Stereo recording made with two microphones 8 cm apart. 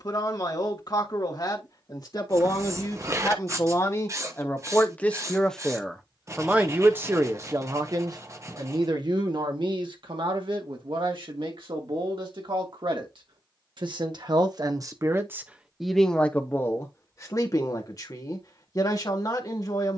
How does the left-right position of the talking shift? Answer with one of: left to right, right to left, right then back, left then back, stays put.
right then back.